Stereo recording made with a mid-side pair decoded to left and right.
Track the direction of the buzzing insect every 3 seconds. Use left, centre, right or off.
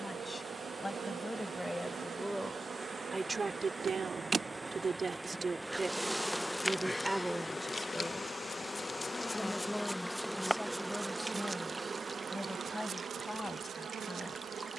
right, right, left, centre, right.